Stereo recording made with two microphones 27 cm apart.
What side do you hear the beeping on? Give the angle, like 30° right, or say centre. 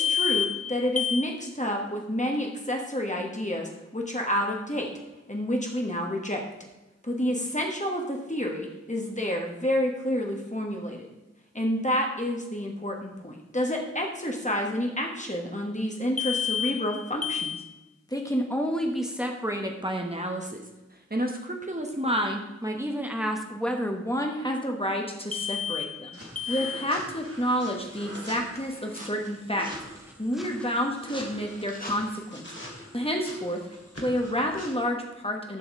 60° left.